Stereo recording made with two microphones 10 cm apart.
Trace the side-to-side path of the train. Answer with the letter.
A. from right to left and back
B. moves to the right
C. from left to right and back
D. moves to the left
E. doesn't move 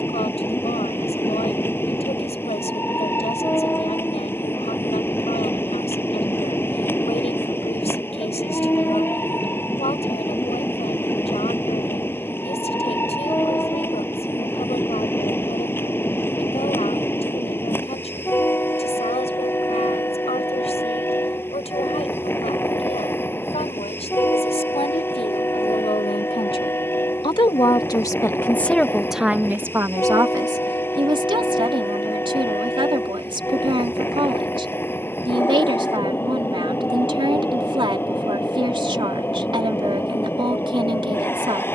E.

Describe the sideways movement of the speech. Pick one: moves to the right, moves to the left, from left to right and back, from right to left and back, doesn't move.
moves to the right.